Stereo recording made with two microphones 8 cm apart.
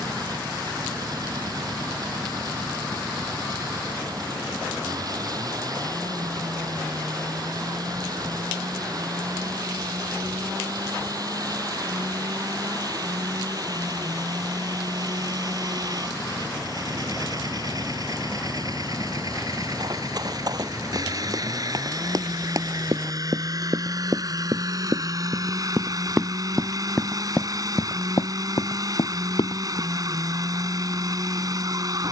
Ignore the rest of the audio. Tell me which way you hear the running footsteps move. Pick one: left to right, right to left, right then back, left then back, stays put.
right to left.